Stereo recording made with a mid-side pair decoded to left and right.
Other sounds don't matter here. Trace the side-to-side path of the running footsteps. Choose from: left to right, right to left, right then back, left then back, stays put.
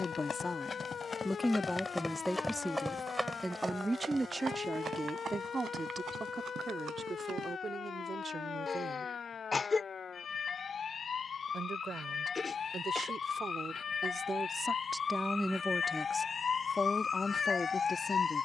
left to right.